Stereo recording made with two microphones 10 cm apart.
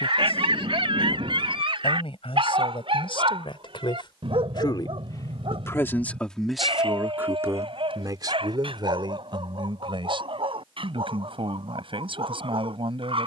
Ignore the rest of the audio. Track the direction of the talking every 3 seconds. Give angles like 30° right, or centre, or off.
70° left, 50° left, 20° right, 60° right, 70° right.